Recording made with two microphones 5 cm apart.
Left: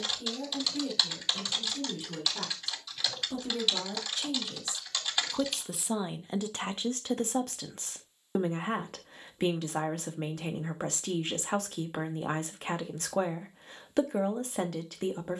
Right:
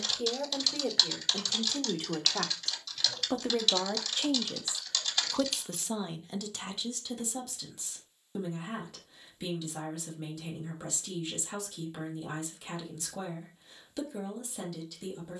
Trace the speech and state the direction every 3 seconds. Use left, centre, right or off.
right, right, left, left, left.